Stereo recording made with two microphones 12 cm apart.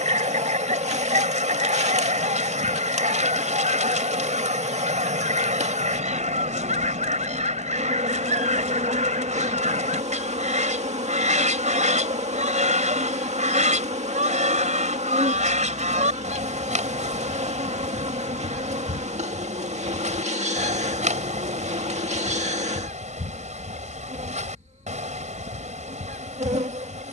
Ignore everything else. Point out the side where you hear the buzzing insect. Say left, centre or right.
right.